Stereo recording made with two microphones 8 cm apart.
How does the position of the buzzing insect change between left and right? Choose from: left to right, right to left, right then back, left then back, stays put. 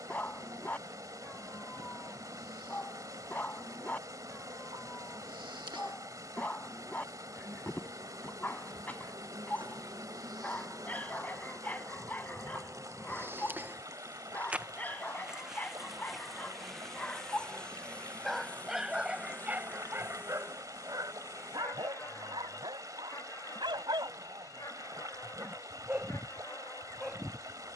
right to left.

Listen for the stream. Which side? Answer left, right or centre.
right.